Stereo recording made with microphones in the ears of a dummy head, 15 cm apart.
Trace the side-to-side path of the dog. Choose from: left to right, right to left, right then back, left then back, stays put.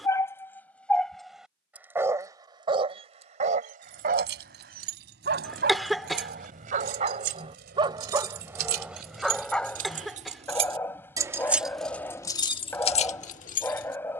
right then back.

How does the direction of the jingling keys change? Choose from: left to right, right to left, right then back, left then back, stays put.
right to left.